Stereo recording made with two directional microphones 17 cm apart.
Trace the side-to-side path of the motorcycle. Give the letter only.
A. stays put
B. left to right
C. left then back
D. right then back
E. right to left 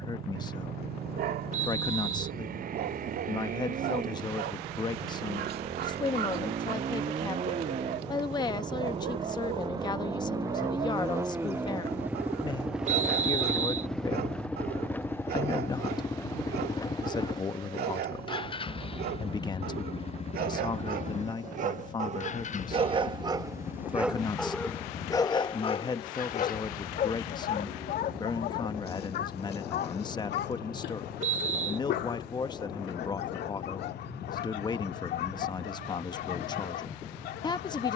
E.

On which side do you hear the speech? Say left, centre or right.
left.